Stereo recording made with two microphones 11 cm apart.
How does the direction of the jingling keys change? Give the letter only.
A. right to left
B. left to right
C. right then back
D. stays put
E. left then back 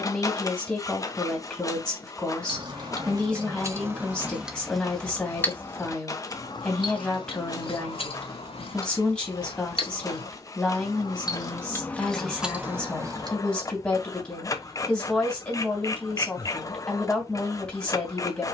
E.